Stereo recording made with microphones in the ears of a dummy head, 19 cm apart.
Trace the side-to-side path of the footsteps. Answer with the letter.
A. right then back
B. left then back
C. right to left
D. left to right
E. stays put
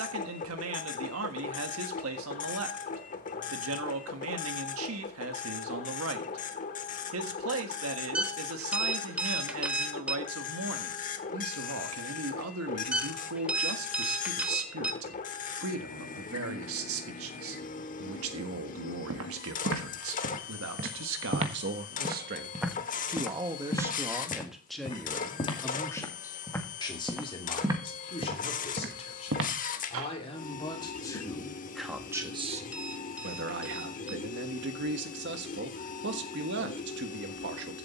B.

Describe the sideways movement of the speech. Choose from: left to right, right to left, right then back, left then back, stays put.
left then back.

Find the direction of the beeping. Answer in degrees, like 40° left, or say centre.
10° right.